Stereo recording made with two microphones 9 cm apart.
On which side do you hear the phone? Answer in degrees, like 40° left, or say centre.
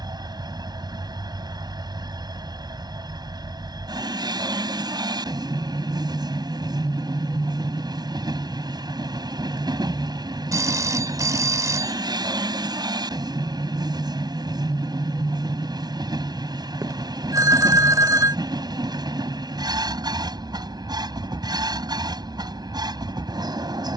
40° right.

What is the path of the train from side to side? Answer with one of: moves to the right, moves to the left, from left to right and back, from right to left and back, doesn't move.
doesn't move.